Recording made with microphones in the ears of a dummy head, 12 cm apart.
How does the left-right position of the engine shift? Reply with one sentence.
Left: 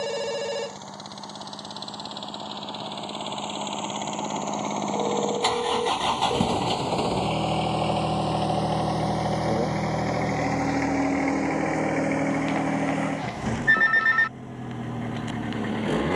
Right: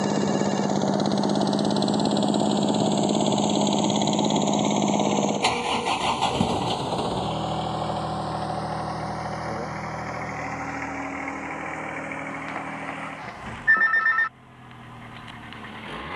In this clip you hear the engine go from the right side to the left.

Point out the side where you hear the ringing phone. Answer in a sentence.
You can hear the ringing phone on the left.